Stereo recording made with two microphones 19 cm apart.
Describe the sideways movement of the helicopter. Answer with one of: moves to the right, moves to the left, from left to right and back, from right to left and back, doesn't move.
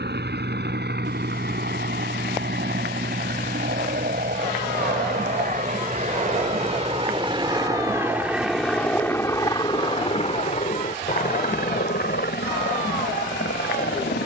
moves to the left.